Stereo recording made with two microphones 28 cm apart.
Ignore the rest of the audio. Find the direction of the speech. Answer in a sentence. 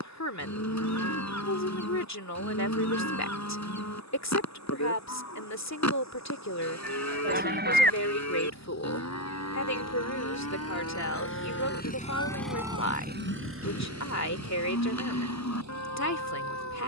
In this clip you hear the speech on the left.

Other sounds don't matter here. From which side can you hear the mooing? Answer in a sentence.
You can hear the mooing on the left.